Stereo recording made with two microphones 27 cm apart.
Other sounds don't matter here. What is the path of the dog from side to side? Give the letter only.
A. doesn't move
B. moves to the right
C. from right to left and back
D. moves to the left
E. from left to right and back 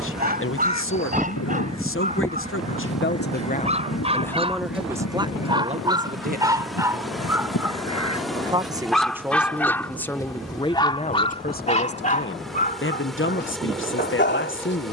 D.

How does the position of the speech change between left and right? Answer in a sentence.
In this clip you hear the speech move from left to right and back again.